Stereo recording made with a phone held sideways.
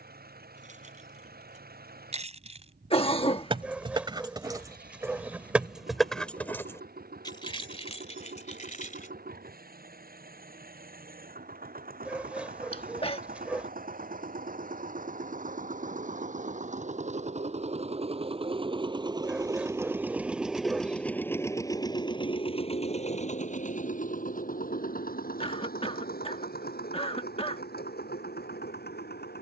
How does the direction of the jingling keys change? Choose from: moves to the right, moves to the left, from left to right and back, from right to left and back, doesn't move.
moves to the left.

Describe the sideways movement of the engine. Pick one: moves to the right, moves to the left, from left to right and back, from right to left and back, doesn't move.
moves to the left.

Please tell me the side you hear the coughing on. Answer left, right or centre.
left.